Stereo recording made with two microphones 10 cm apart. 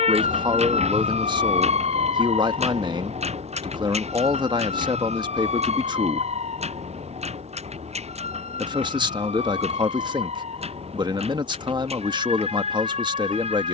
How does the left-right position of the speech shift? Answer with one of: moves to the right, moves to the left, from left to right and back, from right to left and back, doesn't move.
doesn't move.